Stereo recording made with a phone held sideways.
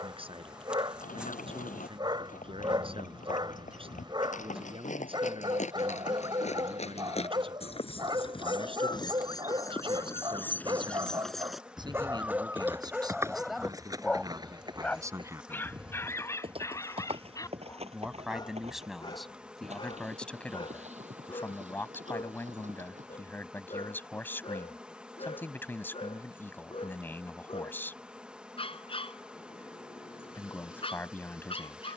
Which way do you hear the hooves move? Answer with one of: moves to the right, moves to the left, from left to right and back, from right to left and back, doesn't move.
moves to the right.